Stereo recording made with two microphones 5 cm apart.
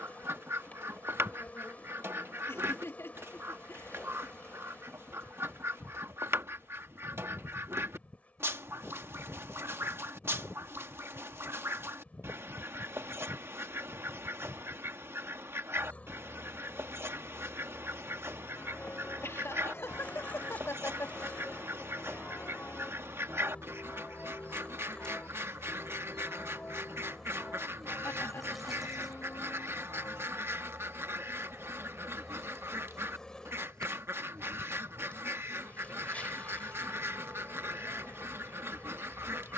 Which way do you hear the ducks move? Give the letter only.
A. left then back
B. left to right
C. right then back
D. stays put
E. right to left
D.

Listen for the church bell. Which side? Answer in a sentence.
In this clip you hear the church bell on the left.